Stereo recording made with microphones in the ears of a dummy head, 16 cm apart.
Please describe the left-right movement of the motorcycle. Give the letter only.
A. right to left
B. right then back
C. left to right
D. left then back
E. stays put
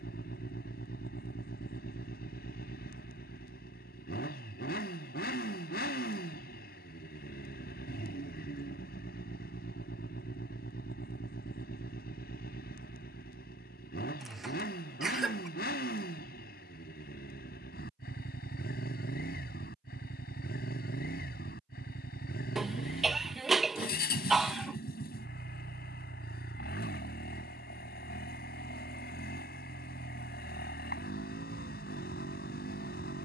E.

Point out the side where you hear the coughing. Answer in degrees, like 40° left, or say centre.
centre.